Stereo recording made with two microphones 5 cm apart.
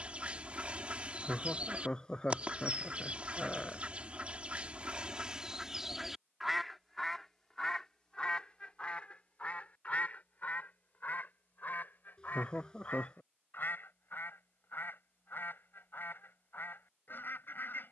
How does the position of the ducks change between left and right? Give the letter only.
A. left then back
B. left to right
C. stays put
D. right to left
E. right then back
D.